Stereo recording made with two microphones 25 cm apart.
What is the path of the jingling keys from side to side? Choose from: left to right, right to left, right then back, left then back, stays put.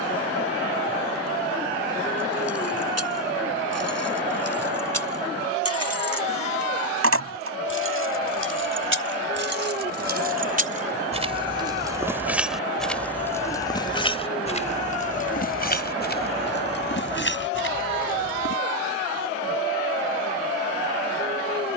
right to left.